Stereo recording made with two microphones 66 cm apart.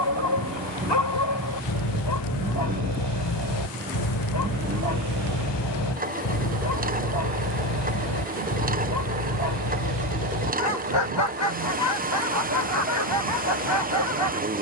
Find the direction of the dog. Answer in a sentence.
In this clip you hear the dog on the left.